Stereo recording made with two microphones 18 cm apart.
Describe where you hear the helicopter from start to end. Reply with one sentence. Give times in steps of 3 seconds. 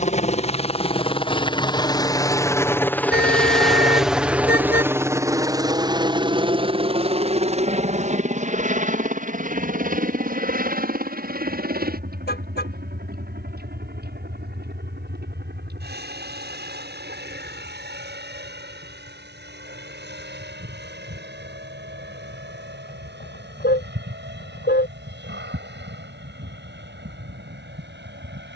You can hear the helicopter on the left from 0 s, in the centre from 3 s and on the right from 6 s.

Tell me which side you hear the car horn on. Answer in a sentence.
In this clip you hear the car horn on the left.